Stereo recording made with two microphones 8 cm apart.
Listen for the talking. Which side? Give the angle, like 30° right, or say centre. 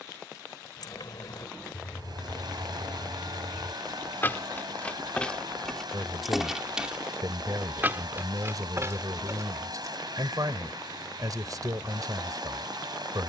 50° right.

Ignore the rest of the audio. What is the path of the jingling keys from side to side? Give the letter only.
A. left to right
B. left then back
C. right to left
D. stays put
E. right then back
A.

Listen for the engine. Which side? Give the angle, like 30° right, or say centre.
60° right.